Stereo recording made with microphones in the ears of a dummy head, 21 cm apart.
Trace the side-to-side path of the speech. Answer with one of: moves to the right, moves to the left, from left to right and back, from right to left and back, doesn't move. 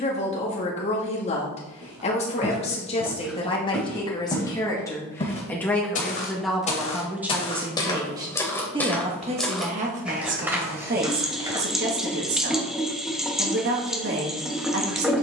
moves to the right.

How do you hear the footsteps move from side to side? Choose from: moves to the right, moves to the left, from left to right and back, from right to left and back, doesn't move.
from right to left and back.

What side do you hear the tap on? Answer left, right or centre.
centre.